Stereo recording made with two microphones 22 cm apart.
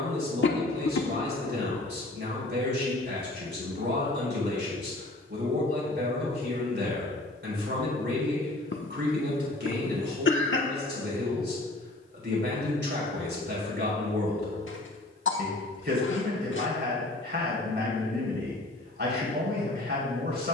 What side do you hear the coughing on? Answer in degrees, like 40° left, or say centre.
60° left.